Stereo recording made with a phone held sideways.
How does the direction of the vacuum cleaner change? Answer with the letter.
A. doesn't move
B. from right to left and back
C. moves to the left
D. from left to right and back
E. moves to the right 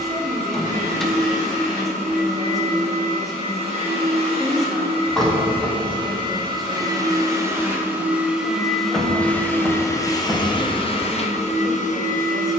C.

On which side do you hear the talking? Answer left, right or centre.
centre.